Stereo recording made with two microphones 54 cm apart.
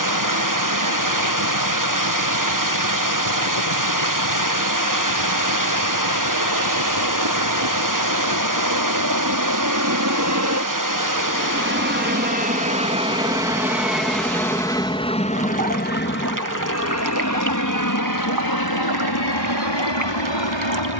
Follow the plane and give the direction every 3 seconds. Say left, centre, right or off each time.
right, right, right, right, centre, left, left.